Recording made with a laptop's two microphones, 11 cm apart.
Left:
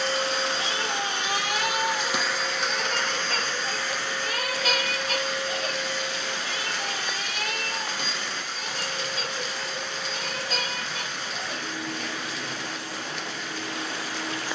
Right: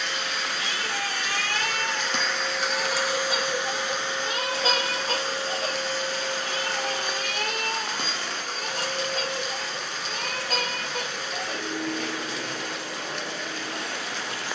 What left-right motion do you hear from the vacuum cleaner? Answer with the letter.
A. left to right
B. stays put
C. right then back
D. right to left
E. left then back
A.